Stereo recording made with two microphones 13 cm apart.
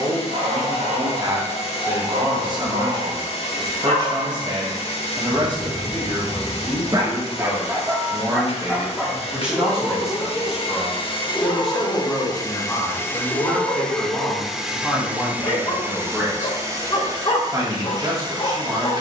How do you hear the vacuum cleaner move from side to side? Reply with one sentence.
You can hear the vacuum cleaner move from left to right.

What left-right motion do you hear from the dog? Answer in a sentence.
In this clip you hear the dog move from right to left.